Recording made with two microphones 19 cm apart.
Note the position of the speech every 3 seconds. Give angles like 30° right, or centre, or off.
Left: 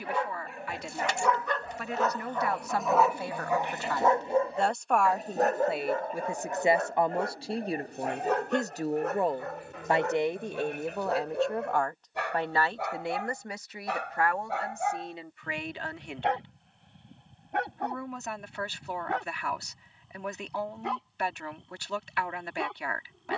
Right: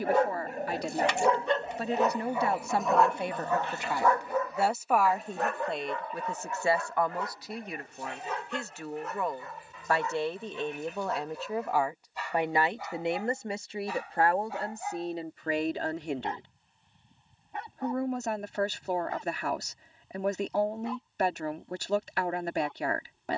30° right, 10° right, 30° left, 10° left, 30° right, 40° right, 40° right, 40° right.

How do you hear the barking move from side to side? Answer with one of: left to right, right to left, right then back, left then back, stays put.
right to left.